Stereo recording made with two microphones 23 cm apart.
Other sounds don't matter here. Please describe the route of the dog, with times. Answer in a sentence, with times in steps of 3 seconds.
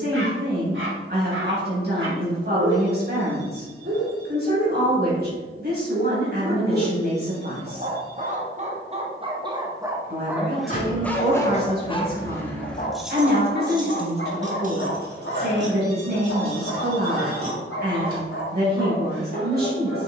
You can hear the dog on the right from 0 s, in the centre from 9 s and on the left from 12 s.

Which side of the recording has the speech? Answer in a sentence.
In this clip you hear the speech on the right.